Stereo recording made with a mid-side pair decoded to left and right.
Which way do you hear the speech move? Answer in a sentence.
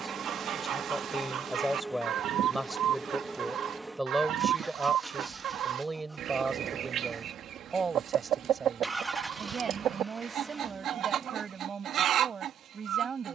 In this clip you hear the speech move to the right.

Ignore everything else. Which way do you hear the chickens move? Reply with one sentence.
You can hear the chickens stay put.